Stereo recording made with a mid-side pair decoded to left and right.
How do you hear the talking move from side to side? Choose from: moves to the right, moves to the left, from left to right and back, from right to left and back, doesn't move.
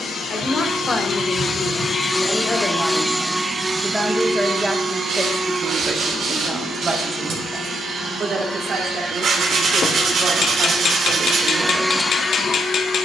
moves to the right.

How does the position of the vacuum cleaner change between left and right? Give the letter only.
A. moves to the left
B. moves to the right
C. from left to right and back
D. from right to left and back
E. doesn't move
C.